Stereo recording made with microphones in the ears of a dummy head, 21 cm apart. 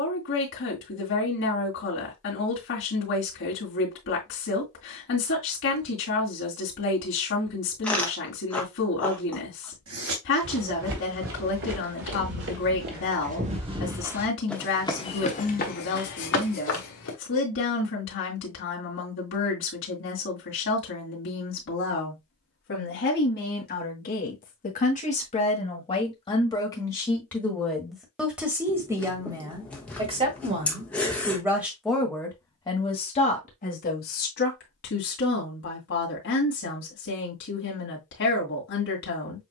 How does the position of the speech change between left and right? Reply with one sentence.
In this clip you hear the speech go right and come back.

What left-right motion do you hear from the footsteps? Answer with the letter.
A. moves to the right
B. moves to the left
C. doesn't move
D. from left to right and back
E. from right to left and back
B.